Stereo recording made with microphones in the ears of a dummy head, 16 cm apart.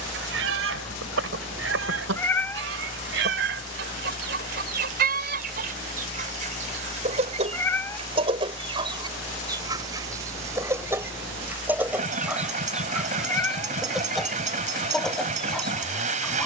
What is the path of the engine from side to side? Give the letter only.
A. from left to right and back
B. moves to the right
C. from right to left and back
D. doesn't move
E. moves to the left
D.